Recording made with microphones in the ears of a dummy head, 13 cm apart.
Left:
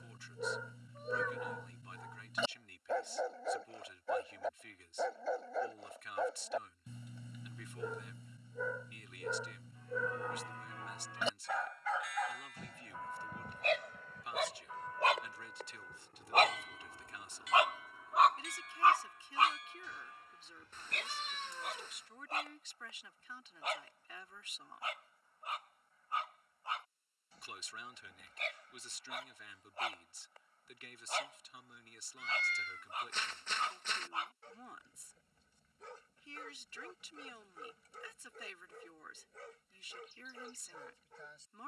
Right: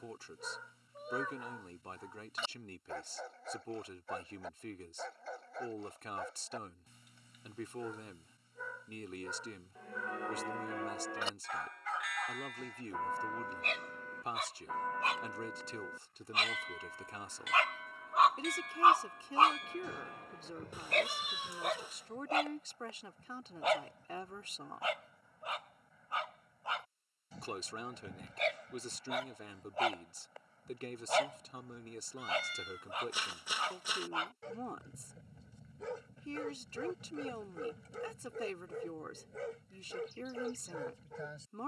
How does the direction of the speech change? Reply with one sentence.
You can hear the speech stay put.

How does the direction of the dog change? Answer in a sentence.
In this clip you hear the dog go from the left side to the right.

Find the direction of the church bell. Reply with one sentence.
In this clip you hear the church bell on the right.